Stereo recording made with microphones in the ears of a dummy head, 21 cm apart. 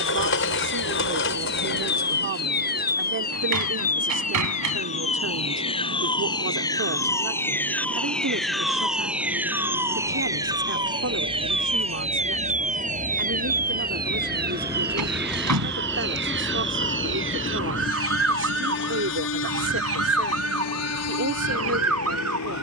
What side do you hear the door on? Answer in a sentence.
In this clip you hear the door on the right.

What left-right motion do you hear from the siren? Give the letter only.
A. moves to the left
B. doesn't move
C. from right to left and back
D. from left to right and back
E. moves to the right
E.